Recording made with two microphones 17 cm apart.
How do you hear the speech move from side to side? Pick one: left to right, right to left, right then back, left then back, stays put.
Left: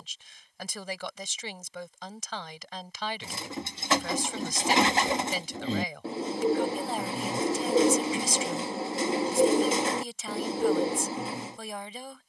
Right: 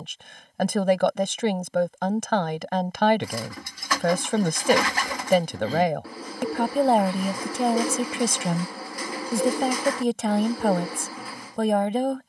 stays put.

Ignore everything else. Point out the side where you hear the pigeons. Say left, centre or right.
left.